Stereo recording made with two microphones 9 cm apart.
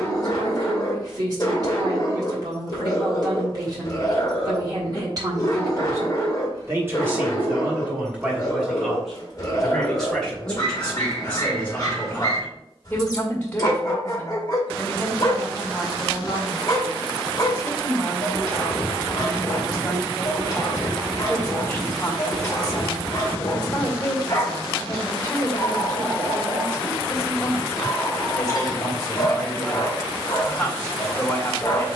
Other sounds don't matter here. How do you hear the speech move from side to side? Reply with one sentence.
In this clip you hear the speech travel towards the left.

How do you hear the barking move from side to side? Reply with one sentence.
You can hear the barking stay put.